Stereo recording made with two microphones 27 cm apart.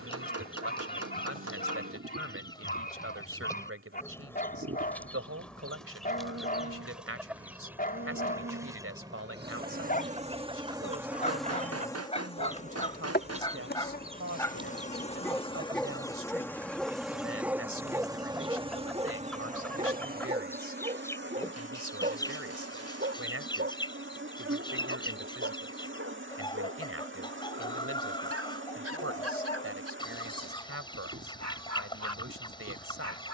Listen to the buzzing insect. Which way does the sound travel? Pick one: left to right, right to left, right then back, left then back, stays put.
left then back.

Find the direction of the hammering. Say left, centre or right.
right.